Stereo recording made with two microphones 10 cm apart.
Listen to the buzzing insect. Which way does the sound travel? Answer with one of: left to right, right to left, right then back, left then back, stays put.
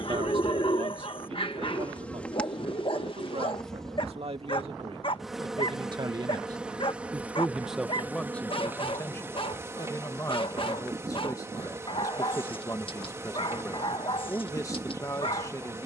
left to right.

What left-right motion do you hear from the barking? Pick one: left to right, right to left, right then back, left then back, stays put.
stays put.